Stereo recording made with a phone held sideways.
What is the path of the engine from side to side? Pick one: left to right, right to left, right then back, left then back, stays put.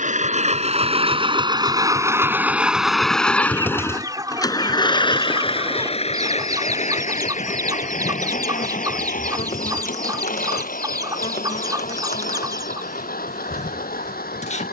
right to left.